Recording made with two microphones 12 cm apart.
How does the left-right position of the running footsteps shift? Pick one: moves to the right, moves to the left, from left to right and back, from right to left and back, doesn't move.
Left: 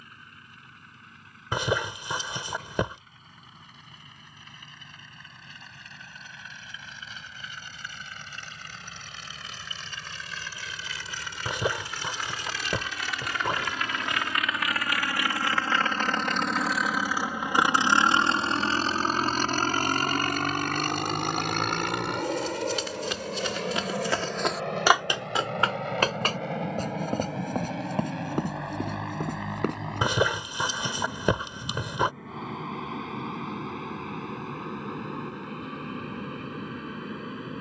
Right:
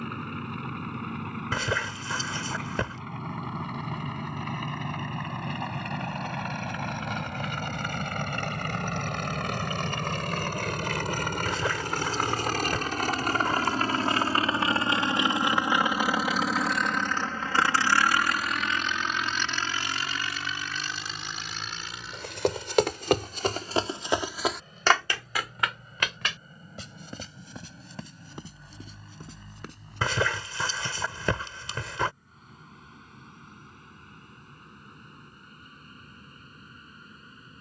moves to the left.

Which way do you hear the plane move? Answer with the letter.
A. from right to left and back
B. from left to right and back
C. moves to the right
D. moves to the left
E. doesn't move
D.